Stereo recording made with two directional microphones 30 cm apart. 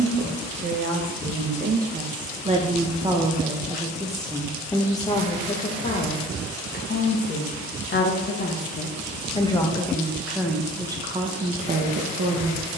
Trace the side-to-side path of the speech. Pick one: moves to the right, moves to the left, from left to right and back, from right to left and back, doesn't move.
from right to left and back.